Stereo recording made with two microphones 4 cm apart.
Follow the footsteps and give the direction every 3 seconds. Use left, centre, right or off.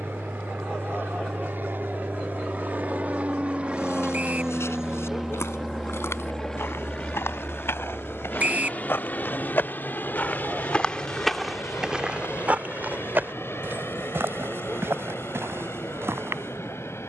off, left, left, left, right, right.